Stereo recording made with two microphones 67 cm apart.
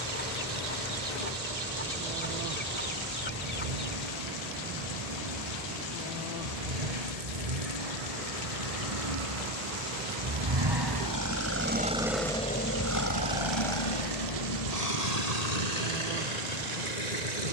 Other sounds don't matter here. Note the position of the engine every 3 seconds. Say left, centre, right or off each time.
right, right, right, right, left, left.